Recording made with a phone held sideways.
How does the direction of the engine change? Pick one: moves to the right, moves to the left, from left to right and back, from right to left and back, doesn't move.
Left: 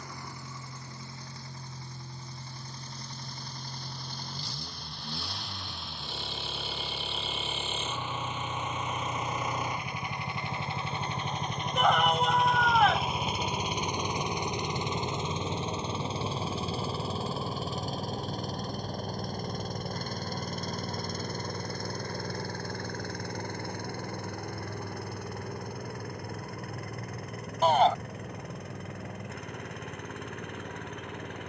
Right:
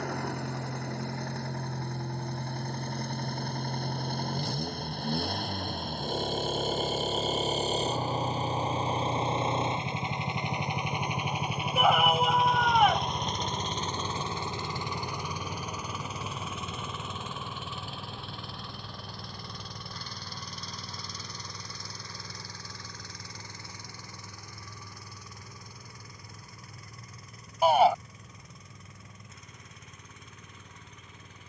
moves to the left.